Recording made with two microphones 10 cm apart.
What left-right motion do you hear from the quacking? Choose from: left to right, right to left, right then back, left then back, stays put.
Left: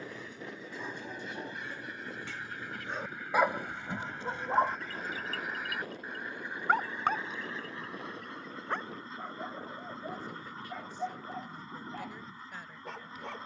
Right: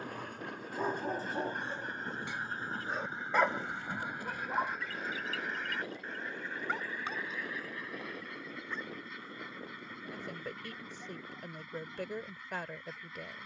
right to left.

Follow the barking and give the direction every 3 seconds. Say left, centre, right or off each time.
right, left, left, left, left.